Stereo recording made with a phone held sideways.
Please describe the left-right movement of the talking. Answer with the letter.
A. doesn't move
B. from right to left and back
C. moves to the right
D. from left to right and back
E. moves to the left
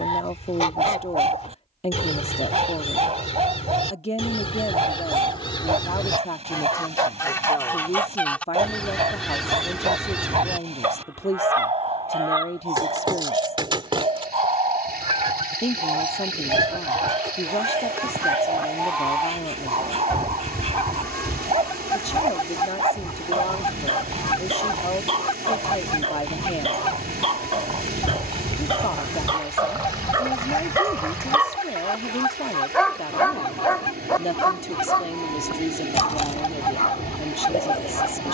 A.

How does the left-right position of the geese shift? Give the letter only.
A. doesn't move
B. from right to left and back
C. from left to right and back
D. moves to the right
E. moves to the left
C.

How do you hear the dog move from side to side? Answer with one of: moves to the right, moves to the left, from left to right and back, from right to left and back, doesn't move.
moves to the left.